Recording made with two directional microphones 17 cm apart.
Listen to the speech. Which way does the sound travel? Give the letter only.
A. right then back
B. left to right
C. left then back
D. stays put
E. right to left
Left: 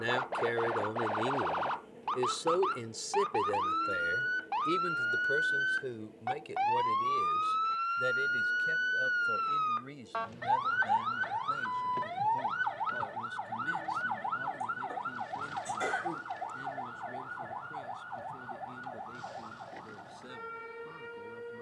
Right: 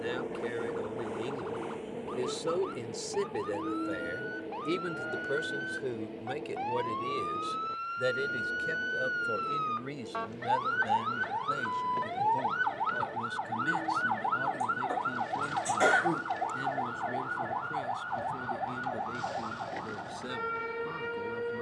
B.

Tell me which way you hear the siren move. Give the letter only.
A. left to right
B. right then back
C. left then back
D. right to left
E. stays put
A.